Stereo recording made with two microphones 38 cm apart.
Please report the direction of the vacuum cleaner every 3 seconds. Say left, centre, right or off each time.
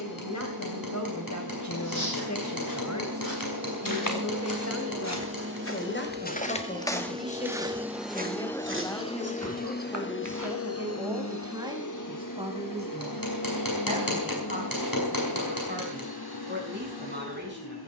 right, right, centre, left, left, left.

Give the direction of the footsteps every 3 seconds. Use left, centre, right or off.
left, left, centre, right, off, off.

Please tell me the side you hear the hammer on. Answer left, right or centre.
left.